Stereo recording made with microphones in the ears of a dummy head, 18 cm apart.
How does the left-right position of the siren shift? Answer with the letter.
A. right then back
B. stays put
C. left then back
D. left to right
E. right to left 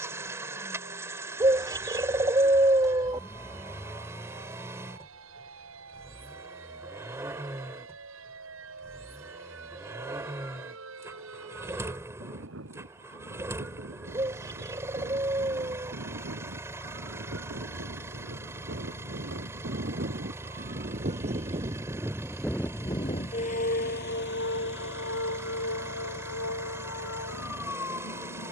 E.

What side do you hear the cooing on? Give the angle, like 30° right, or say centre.
20° right.